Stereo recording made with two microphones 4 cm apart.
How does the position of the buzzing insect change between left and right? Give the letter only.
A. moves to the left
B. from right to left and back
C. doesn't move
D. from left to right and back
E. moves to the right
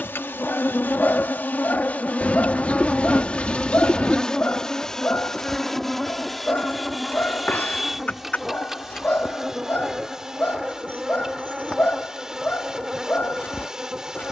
E.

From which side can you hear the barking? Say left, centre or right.
left.